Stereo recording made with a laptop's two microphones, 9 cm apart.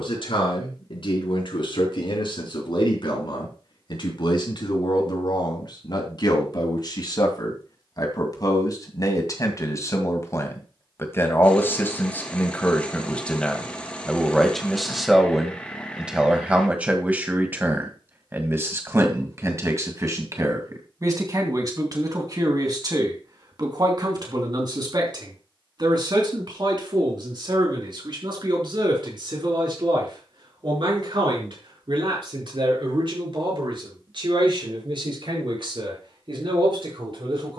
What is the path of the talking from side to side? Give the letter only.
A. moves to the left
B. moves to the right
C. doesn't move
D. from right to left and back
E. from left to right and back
B.